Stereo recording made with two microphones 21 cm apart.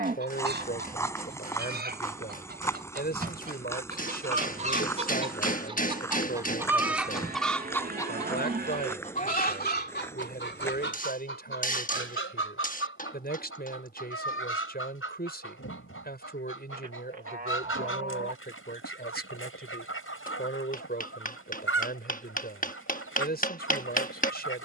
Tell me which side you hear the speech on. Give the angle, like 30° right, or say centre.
50° left.